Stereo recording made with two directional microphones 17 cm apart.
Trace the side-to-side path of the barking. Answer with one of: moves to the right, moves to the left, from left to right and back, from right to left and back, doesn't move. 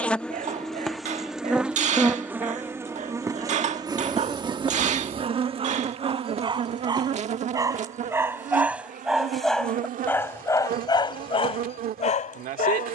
moves to the left.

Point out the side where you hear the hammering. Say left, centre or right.
right.